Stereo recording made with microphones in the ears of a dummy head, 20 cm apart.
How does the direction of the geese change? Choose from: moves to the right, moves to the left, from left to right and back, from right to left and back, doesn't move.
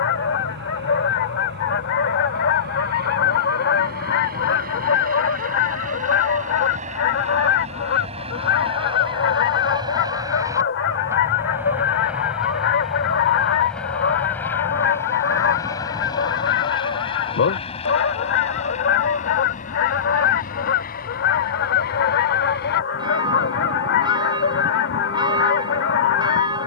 doesn't move.